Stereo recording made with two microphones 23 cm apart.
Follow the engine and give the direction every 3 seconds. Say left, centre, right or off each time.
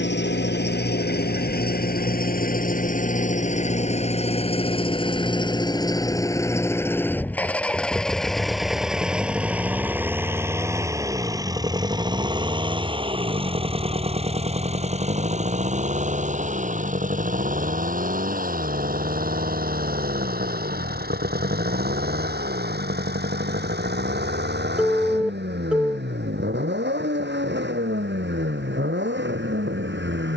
left, left, centre, centre, right, right, right, right, right, right.